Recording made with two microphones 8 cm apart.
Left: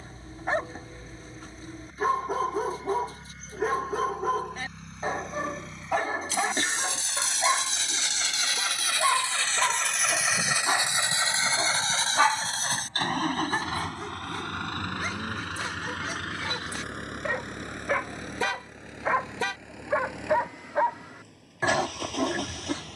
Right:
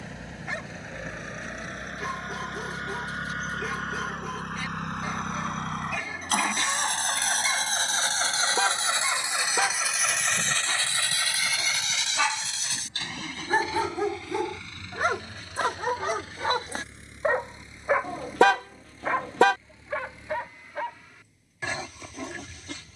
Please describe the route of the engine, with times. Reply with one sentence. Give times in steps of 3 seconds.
In this clip you hear the engine on the right from 0 s, in the centre from 9 s and on the left from 12 s.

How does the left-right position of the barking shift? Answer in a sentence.
You can hear the barking go right and come back.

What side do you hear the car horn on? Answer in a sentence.
You can hear the car horn on the right.